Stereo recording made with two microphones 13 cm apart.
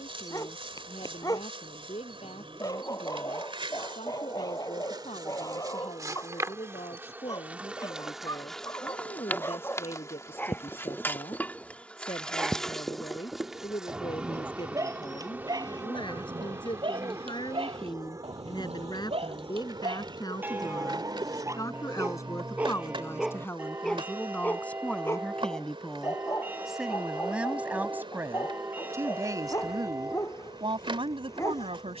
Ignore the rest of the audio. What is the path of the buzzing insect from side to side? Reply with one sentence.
You can hear the buzzing insect go left and come back.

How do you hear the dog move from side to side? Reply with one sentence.
In this clip you hear the dog go right and come back.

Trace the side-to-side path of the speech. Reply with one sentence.
You can hear the speech move from left to right.